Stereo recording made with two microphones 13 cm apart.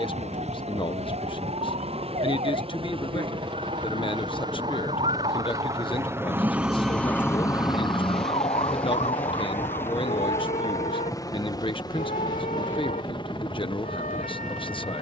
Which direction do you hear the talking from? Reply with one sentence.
You can hear the talking on the left.